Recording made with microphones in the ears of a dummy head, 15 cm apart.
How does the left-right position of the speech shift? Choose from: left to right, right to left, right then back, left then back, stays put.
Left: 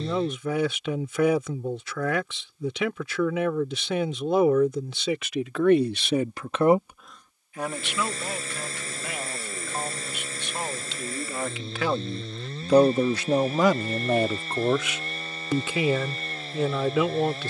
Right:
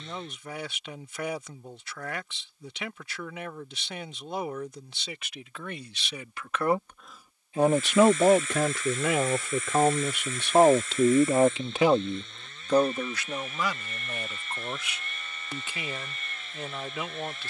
right then back.